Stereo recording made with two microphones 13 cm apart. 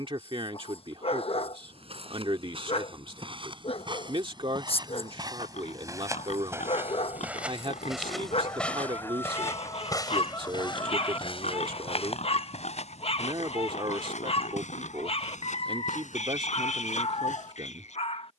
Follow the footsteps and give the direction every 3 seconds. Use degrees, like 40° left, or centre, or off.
50° right, 40° right, 10° right, 40° left, 70° left, 80° left.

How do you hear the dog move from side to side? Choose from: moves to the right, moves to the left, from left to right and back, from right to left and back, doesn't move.
doesn't move.